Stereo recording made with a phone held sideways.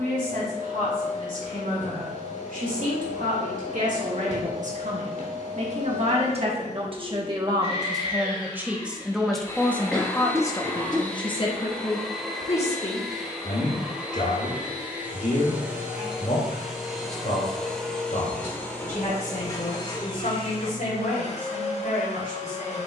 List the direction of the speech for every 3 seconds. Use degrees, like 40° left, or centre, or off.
70° right, 60° right, 30° right, 20° left, 50° left, 70° left, 70° left, 80° left.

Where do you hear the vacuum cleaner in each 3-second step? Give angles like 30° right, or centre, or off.
50° left, 50° left, 40° left, 10° left, centre, centre, 30° left, 50° left.